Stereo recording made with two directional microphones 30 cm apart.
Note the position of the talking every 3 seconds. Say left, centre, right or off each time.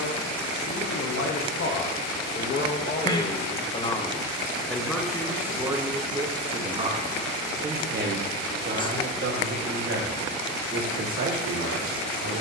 left, centre, right, right.